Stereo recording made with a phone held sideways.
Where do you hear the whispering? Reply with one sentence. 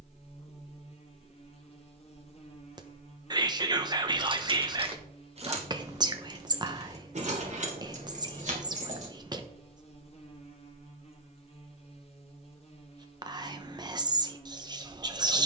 You can hear the whispering on the right.